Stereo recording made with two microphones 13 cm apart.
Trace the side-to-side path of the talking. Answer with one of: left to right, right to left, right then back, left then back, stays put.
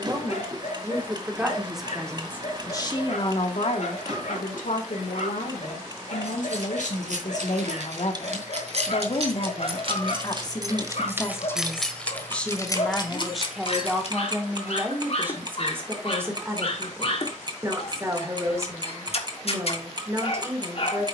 left then back.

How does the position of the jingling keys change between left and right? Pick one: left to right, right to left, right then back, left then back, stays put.
right to left.